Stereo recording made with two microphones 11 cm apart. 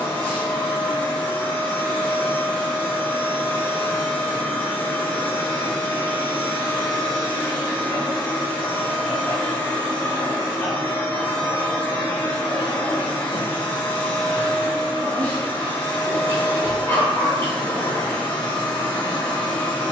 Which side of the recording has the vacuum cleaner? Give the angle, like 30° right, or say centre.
10° left.